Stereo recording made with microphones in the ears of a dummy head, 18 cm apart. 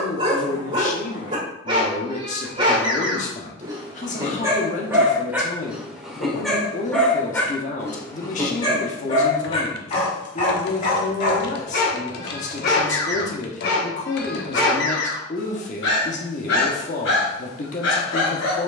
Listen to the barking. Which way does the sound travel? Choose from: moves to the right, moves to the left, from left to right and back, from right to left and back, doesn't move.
moves to the left.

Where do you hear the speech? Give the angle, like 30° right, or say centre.
40° left.